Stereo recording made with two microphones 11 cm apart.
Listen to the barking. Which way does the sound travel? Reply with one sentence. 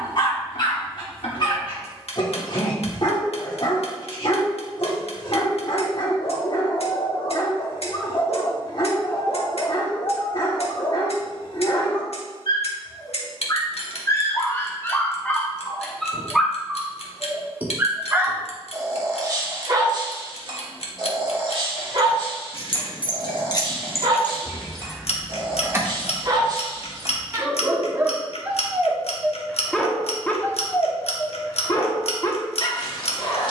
In this clip you hear the barking move from left to right and back again.